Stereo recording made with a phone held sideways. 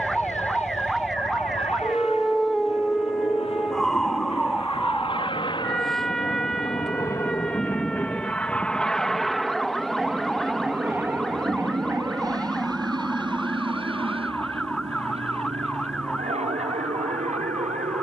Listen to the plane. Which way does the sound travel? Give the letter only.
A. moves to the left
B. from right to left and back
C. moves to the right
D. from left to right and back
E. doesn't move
C.